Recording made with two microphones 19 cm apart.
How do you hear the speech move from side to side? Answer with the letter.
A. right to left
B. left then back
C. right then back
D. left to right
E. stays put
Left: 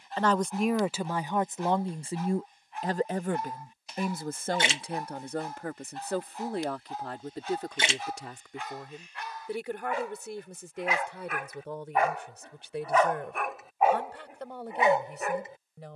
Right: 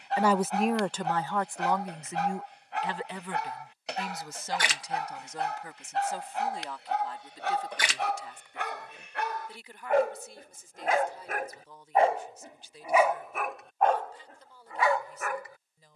A.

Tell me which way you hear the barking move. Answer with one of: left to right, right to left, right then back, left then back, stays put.
right to left.